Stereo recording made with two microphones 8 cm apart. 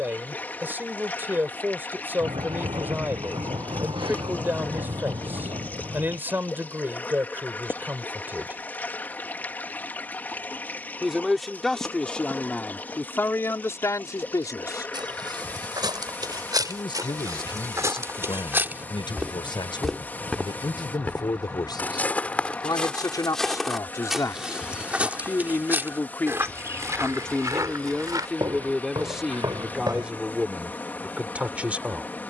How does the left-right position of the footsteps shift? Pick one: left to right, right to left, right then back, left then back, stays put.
left then back.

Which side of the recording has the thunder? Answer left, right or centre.
right.